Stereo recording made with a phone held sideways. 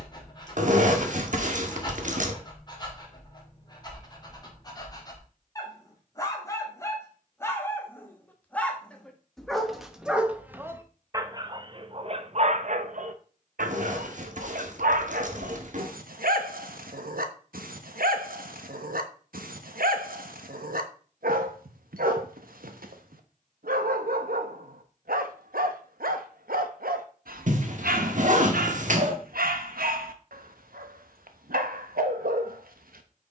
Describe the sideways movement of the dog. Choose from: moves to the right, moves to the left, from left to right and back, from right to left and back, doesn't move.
moves to the right.